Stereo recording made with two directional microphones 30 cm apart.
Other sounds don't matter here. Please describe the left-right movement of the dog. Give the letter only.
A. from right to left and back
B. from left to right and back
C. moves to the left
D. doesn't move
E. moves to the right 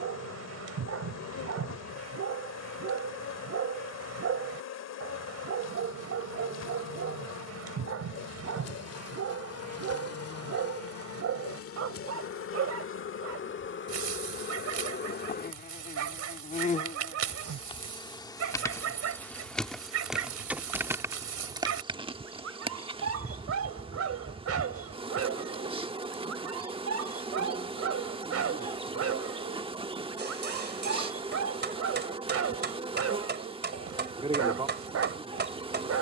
D.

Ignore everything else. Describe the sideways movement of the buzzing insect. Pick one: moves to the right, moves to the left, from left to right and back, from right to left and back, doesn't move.
moves to the right.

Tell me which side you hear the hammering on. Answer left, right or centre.
right.